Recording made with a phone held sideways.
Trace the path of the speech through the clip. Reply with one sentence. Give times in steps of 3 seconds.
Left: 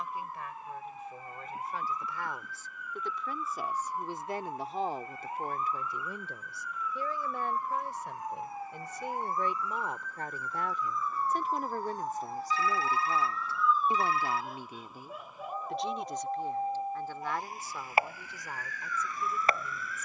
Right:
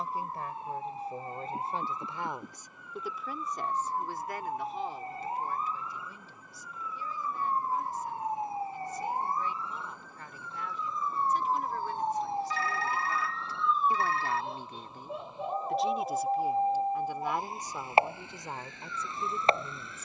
You can hear the speech on the right from 0 s, on the left from 3 s, in the centre from 15 s and on the right from 18 s.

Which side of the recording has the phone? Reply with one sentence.
In this clip you hear the phone on the right.